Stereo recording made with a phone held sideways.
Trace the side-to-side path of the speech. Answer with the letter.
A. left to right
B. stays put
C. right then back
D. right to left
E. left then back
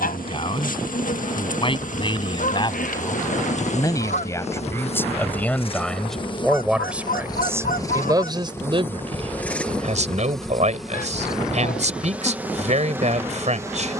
A.